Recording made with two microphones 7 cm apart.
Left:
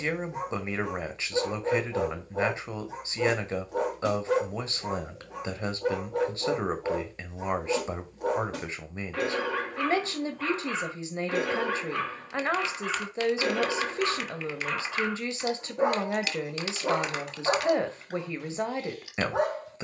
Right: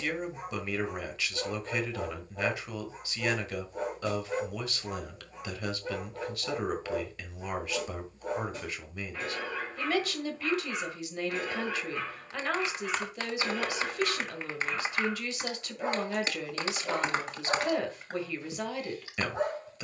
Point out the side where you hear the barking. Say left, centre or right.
left.